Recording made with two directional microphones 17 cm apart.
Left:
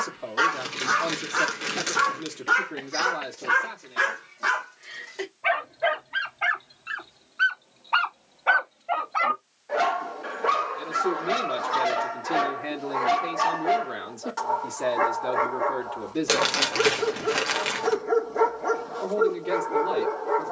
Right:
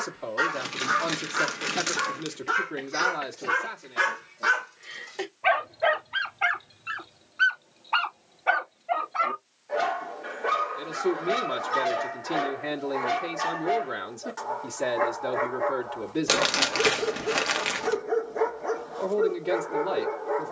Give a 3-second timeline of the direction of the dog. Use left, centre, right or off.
left, centre, centre, left, left, left, left.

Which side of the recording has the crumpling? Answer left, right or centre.
centre.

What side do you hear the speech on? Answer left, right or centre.
centre.